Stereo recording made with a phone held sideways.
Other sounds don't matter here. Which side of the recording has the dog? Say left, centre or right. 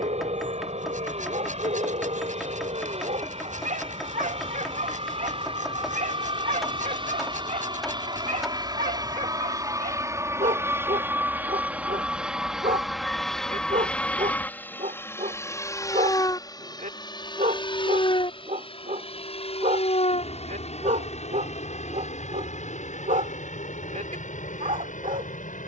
right.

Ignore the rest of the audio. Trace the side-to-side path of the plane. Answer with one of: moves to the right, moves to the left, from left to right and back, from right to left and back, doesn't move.
moves to the left.